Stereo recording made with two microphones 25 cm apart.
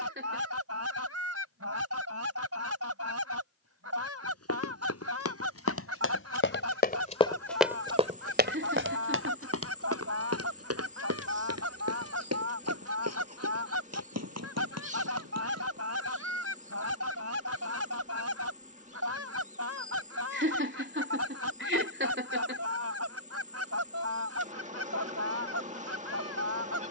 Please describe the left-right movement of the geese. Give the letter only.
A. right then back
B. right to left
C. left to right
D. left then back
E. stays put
E.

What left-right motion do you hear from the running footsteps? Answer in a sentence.
In this clip you hear the running footsteps travel towards the right.